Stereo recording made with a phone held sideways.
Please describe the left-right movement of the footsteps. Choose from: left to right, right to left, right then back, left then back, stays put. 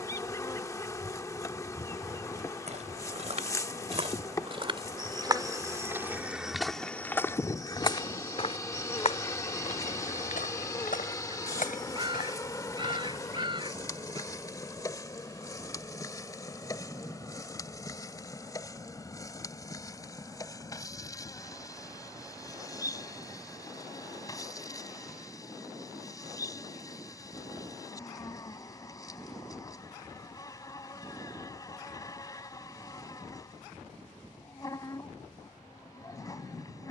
right to left.